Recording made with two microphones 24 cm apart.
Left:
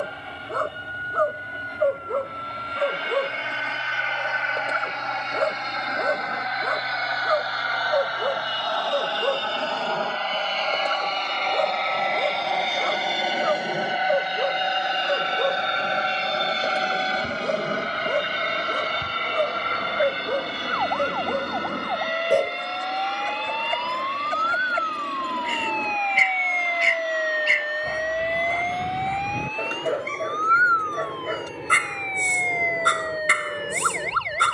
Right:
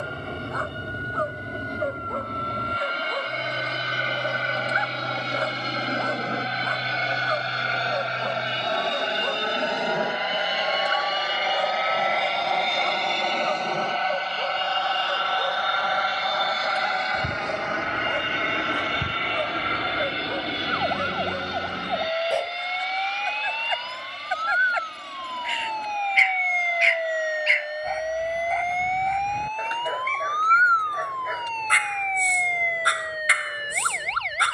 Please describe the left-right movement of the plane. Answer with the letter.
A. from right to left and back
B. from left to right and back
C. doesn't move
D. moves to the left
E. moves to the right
D.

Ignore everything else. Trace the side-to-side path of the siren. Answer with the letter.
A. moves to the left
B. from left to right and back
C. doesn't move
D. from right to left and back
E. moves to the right
A.